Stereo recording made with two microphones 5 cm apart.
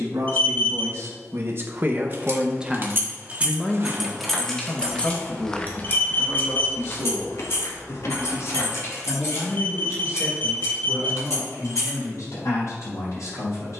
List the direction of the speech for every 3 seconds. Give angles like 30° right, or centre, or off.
40° right, 30° left, 60° left, 70° left, 70° left.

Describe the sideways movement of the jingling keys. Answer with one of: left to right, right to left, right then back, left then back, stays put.
right to left.